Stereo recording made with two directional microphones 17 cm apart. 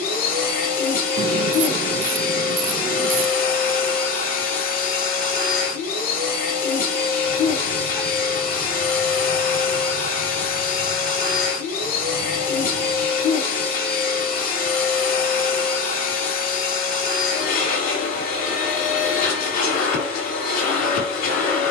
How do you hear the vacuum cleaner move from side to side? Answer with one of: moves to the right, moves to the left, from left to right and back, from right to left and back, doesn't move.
doesn't move.